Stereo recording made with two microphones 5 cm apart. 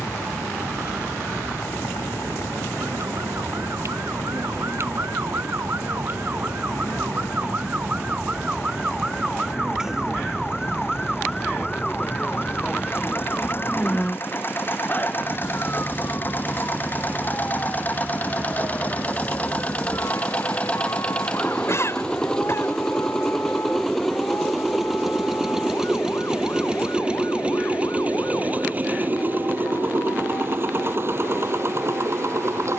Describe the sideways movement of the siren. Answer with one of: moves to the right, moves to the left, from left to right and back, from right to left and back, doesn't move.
moves to the left.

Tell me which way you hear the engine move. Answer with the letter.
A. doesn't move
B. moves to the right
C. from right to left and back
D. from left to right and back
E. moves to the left
B.